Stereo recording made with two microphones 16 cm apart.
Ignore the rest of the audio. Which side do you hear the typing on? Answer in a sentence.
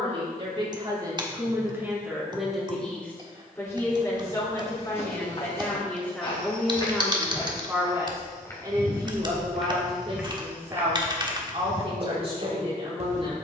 In this clip you hear the typing on the right.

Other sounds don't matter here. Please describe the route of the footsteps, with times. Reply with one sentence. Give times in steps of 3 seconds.
You can hear the footsteps not at all from 0 s, on the left from 3 s, in the centre from 9 s and on the right from 12 s.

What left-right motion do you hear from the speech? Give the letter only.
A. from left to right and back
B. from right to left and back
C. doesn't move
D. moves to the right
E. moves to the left
B.